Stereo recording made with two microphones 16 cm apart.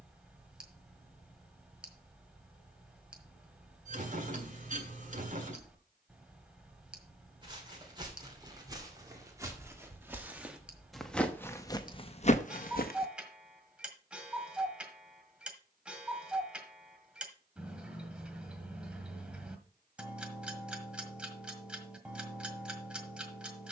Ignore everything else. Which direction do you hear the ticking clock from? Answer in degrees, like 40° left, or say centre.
10° right.